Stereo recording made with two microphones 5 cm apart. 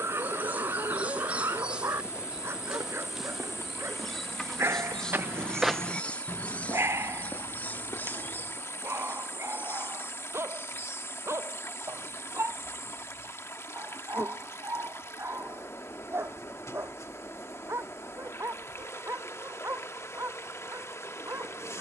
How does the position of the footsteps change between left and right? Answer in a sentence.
In this clip you hear the footsteps move to the left.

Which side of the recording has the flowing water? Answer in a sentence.
You can hear the flowing water on the left.